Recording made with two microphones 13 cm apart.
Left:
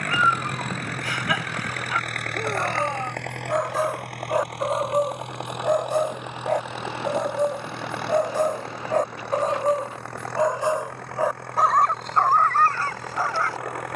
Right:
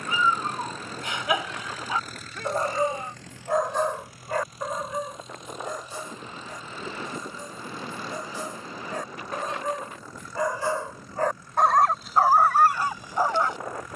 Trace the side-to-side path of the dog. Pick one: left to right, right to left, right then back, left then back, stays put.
left then back.